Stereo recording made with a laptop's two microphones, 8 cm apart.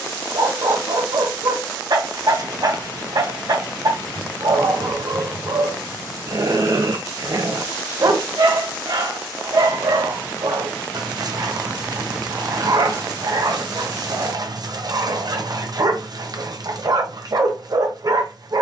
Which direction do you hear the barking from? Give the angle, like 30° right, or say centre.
50° right.